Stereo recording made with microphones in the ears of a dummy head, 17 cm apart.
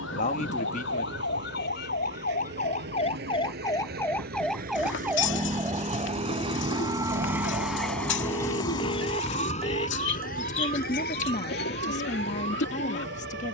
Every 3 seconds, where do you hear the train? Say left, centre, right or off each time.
right, right, centre, left, left.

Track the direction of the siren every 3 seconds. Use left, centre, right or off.
left, centre, right, right, right.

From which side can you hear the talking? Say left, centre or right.
left.